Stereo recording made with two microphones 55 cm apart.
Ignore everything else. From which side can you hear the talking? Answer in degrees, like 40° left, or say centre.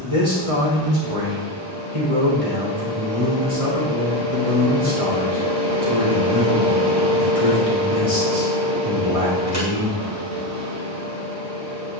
70° right.